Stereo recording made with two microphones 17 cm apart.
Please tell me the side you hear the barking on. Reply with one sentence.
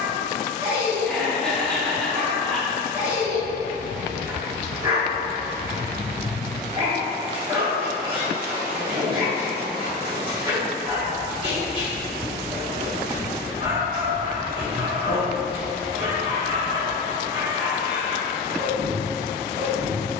You can hear the barking on the right.